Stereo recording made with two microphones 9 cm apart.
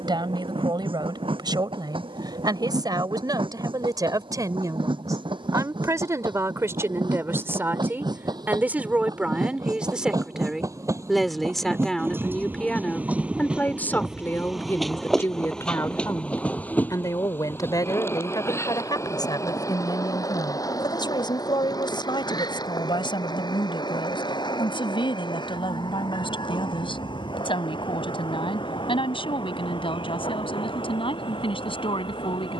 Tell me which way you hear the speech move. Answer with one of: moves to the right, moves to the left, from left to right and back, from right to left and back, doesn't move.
moves to the left.